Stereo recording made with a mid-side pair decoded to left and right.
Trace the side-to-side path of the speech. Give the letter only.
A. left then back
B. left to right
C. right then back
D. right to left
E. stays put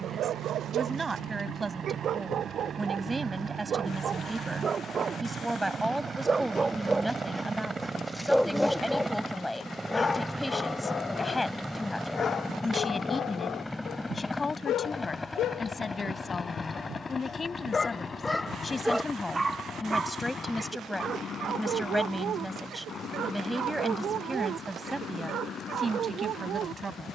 A.